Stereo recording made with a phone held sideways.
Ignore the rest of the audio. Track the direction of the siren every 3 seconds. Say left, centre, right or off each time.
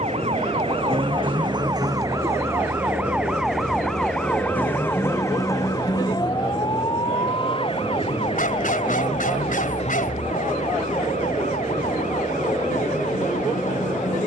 right, centre, left, left, left.